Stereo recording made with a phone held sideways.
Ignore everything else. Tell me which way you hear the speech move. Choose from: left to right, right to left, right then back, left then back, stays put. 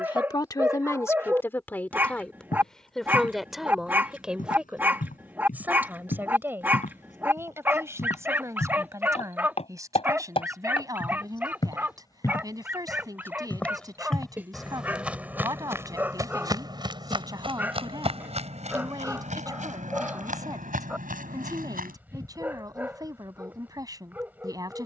left to right.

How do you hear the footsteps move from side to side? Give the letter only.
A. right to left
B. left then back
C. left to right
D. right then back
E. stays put
C.